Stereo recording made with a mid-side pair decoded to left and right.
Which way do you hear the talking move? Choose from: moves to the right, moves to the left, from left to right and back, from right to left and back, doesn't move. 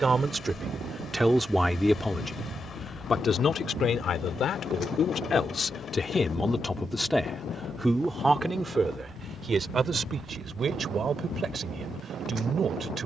from right to left and back.